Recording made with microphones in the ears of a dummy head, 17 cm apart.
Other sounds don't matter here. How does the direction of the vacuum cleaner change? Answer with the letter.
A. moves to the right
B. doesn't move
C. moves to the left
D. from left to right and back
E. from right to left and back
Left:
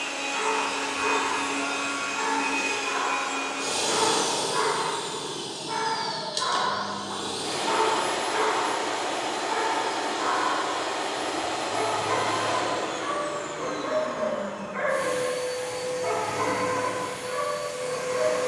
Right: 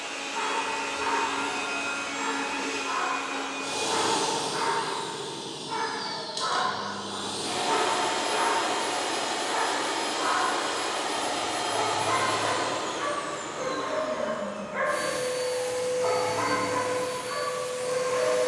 A.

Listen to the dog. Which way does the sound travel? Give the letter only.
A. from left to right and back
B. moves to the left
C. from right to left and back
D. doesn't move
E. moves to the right
E.